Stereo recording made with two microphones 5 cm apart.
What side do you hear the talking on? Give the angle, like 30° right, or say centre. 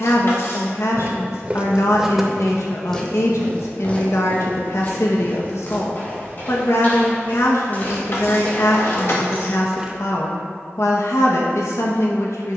70° left.